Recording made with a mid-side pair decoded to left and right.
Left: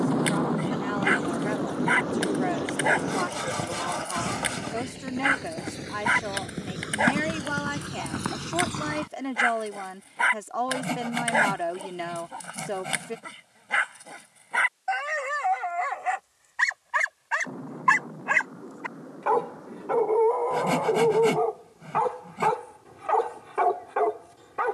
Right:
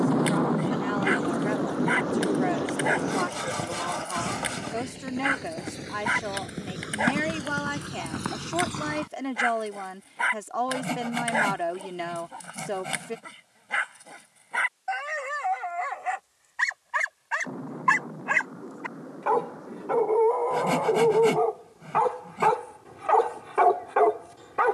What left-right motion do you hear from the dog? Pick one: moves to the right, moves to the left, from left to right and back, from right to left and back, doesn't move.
moves to the right.